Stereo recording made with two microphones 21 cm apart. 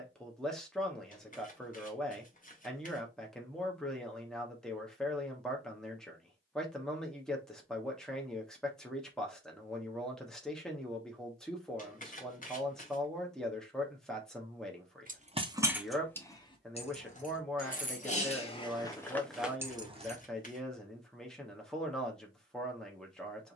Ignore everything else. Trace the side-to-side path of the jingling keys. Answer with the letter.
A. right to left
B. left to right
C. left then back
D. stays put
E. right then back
C.